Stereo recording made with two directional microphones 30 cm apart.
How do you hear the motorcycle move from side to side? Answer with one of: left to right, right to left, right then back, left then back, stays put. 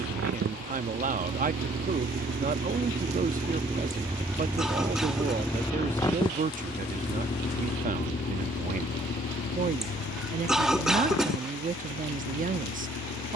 right to left.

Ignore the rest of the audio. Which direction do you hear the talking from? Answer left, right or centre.
right.